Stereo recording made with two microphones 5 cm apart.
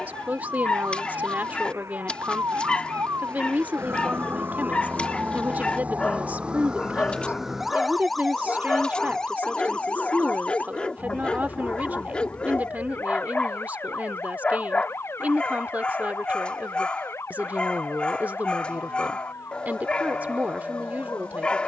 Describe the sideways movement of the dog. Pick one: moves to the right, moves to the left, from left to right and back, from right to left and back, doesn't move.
doesn't move.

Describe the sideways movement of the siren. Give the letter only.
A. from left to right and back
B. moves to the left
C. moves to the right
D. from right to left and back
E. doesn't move
B.